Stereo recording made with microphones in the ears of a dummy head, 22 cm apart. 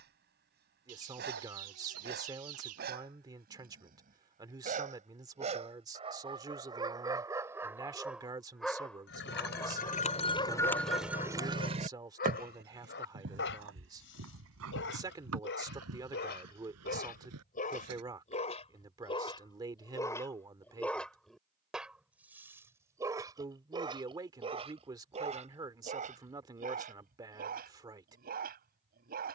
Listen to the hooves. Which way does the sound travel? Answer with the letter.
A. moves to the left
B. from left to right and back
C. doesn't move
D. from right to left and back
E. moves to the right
E.